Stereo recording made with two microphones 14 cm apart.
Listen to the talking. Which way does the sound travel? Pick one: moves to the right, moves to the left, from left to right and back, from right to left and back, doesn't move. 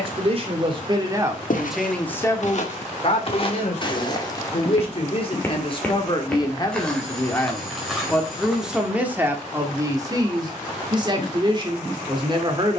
from right to left and back.